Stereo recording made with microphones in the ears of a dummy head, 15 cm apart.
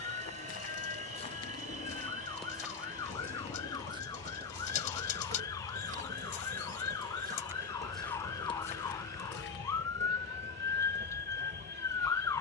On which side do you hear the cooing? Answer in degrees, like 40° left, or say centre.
50° left.